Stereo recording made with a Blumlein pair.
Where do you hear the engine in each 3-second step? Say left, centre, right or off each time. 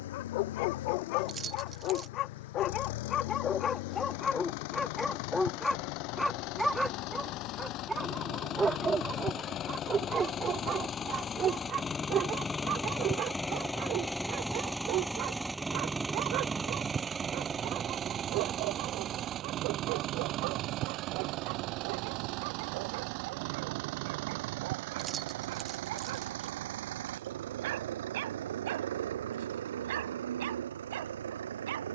left, left, left, left, centre, centre, right, right, right, right, right.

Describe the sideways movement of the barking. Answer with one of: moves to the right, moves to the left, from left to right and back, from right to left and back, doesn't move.
moves to the right.